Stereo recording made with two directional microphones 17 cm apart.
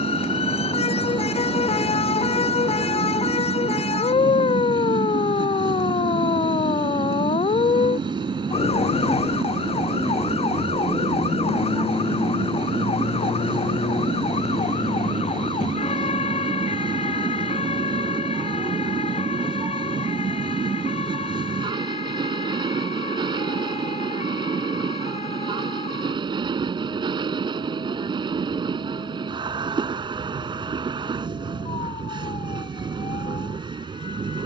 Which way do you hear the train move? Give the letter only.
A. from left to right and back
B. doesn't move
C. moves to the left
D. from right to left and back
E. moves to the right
B.